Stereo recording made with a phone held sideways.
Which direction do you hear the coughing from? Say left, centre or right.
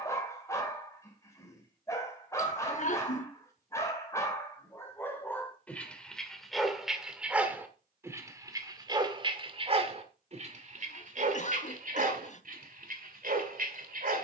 left.